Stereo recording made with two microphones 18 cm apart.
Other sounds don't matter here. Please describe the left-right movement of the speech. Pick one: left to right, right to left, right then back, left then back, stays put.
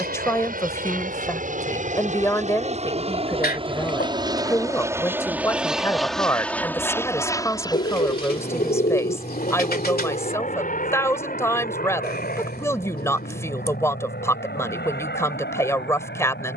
stays put.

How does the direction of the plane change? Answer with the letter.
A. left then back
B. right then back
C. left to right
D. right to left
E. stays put
D.